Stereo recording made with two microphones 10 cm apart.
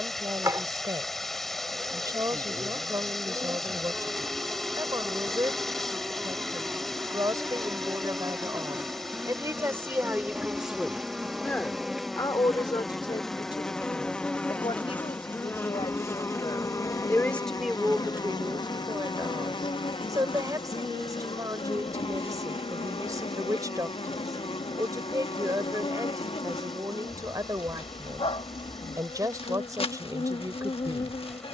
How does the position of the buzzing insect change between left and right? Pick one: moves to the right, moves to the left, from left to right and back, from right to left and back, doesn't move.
moves to the left.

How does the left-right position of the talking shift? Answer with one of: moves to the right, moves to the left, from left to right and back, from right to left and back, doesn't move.
from right to left and back.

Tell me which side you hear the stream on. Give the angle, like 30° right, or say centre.
centre.